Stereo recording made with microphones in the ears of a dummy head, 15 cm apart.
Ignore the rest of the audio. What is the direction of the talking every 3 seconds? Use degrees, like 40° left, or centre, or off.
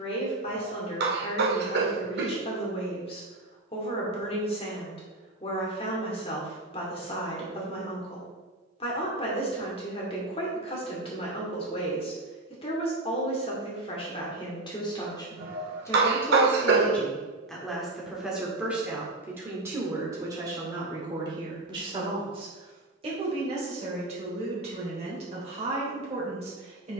30° left, 30° left, 30° left, 30° left, 30° left, 10° left, 10° right, 30° right, 40° right.